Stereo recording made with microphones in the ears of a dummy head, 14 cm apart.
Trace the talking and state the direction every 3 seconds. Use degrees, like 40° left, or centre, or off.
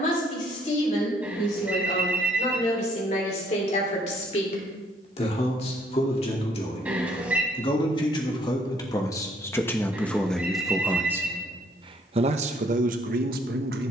50° left, 40° left, 30° left, centre, 60° right.